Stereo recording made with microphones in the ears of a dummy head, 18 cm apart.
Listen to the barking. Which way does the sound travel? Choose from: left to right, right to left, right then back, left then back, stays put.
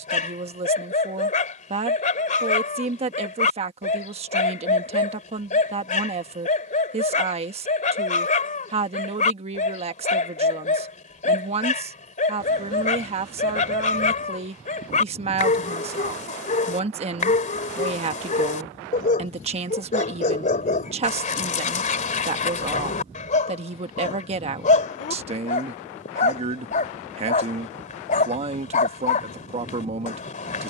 stays put.